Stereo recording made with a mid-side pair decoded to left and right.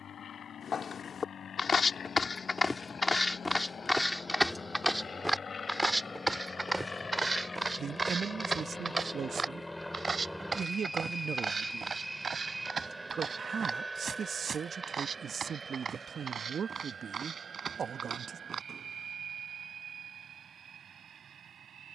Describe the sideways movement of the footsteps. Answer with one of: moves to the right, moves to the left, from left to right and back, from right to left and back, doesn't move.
moves to the right.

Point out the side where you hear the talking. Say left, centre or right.
right.